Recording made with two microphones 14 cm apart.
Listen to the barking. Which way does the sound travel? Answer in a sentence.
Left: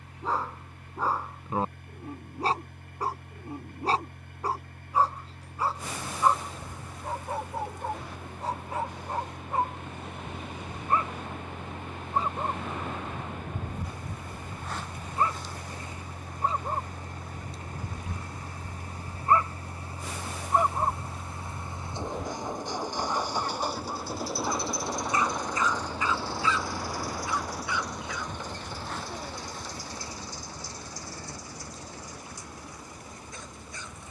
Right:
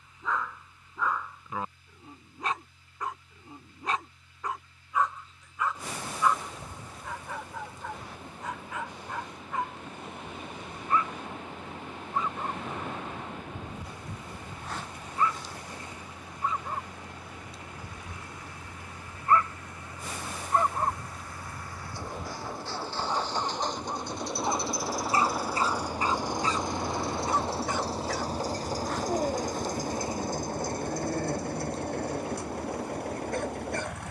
You can hear the barking move to the right.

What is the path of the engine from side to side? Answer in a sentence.
In this clip you hear the engine move from left to right.